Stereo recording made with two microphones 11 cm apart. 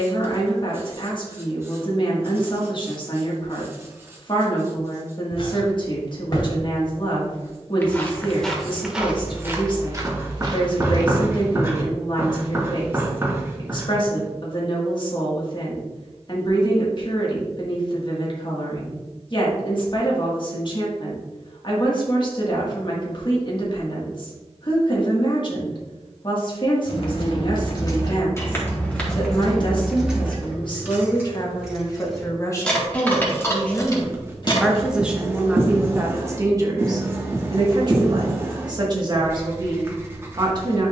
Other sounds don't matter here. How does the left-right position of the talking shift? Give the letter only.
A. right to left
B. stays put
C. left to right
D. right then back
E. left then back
C.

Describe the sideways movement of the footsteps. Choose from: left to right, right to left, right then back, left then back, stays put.
left to right.